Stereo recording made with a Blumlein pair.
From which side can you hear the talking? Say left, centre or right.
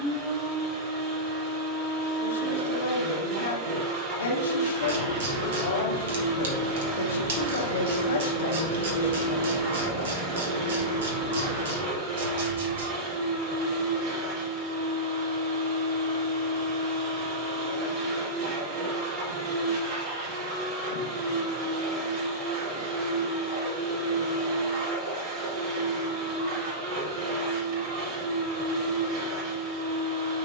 left.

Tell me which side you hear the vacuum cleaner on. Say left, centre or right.
right.